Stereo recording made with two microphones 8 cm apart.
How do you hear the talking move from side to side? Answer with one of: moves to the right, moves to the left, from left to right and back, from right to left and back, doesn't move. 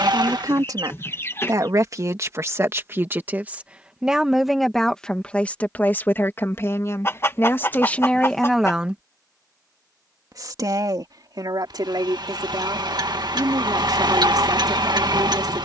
from right to left and back.